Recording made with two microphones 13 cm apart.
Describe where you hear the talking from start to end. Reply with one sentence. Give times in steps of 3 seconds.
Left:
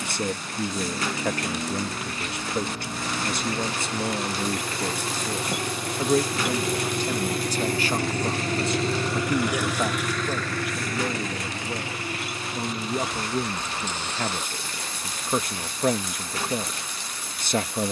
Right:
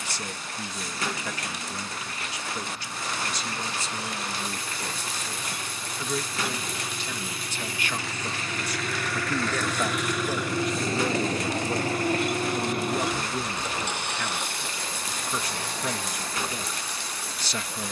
You can hear the talking on the left from 0 s, in the centre from 9 s and on the left from 12 s.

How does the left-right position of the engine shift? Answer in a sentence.
In this clip you hear the engine move from left to right.